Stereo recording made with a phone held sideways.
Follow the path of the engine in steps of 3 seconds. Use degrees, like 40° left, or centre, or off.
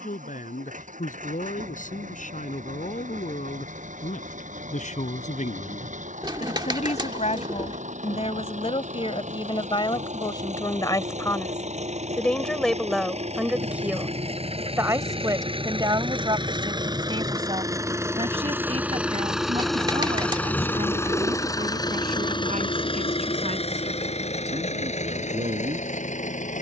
70° right, 70° right, 60° right, 60° right, 50° right, 30° right, centre, 40° left, 60° left.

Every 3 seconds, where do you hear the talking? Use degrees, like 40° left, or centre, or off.
70° left, 70° left, 50° left, 30° left, 10° right, 30° right, 50° right, 60° right, 60° right.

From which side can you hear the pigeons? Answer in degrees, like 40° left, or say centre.
30° right.